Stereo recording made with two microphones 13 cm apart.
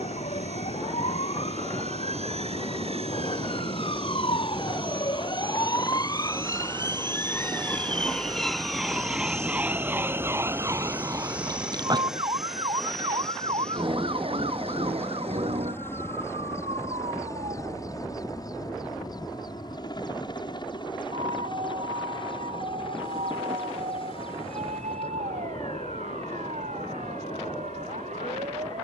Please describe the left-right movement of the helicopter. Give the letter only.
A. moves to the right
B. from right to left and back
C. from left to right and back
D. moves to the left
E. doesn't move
D.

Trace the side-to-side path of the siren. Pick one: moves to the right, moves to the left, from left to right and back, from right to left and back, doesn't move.
moves to the right.